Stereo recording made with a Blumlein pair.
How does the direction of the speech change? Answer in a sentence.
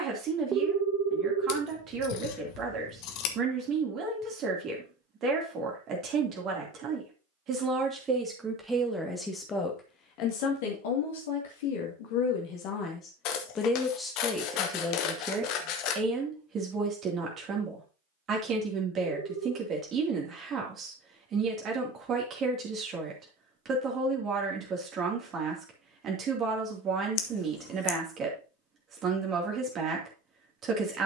You can hear the speech move from right to left and back again.